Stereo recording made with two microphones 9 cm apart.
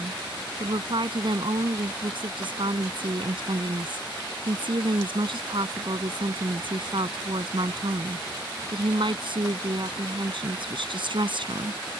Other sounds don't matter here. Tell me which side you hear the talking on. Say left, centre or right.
right.